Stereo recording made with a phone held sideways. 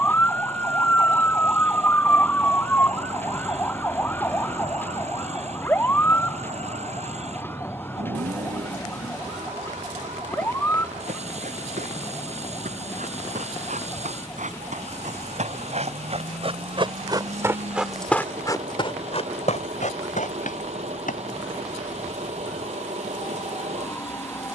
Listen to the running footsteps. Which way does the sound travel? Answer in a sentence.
In this clip you hear the running footsteps travel towards the left.